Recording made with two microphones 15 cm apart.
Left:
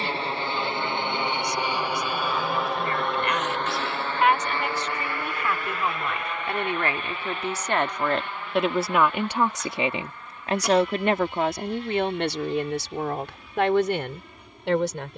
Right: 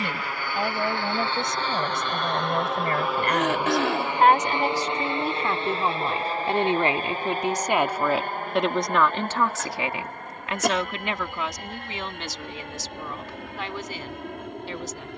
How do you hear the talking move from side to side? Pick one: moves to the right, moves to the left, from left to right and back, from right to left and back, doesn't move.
moves to the left.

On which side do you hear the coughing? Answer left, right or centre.
right.